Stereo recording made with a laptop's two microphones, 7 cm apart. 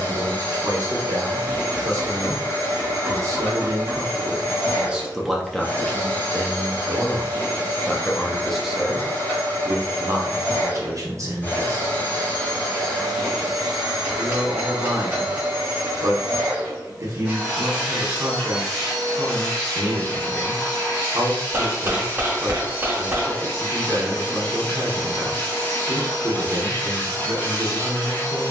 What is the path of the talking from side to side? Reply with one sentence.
In this clip you hear the talking go left and come back.